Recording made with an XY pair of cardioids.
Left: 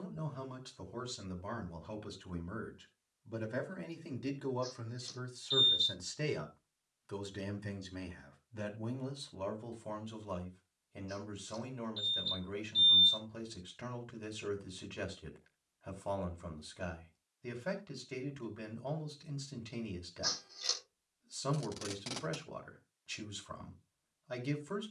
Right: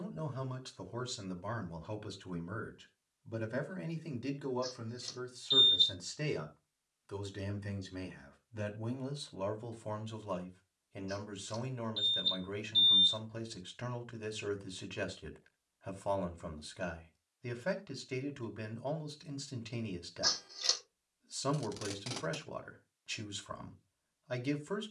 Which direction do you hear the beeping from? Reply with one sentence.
In this clip you hear the beeping on the right.